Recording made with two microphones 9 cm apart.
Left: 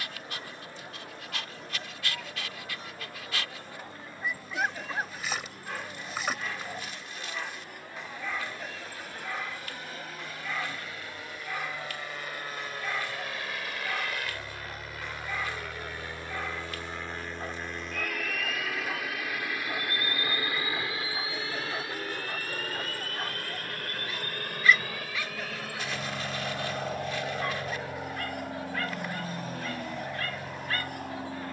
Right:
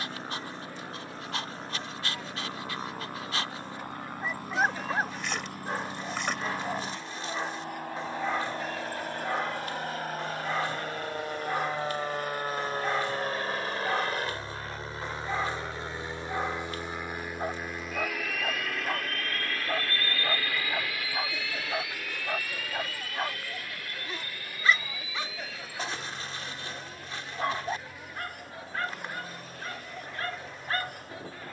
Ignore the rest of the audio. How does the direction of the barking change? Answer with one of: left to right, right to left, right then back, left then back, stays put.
stays put.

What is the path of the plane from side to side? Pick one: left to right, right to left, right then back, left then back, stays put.
right to left.